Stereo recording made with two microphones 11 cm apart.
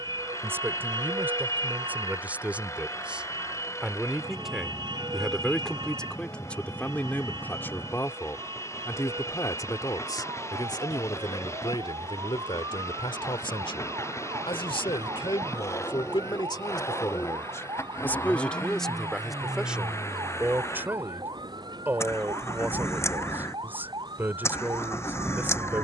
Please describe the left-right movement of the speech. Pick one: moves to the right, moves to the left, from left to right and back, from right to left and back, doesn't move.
from right to left and back.